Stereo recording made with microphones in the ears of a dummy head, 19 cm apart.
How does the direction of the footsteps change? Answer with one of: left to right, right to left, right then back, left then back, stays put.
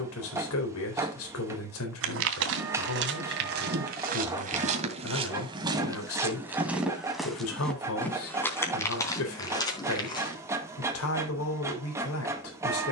right to left.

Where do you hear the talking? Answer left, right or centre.
left.